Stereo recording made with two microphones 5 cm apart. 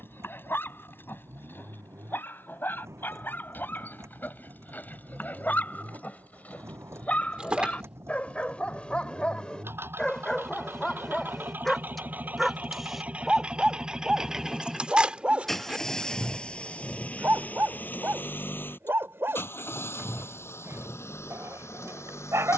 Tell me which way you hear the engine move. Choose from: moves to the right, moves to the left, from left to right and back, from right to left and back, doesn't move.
moves to the left.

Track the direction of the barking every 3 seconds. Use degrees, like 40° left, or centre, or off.
50° left, 40° left, 30° left, 10° left, 10° right, 30° right, 50° right, 60° right.